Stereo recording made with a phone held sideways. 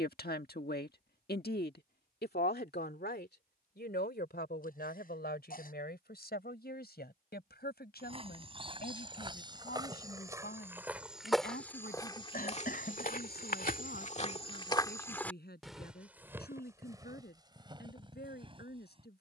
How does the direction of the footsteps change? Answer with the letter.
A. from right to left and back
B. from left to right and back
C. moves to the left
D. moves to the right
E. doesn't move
A.